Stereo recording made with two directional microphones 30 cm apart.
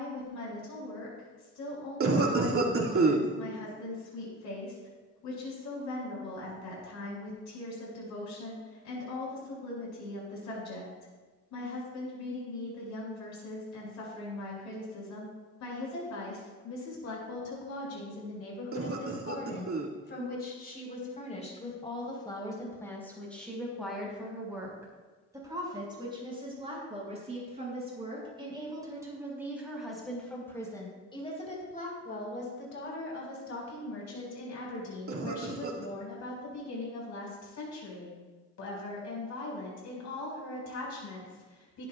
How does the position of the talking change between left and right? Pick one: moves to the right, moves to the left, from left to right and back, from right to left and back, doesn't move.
from left to right and back.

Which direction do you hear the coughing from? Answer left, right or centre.
right.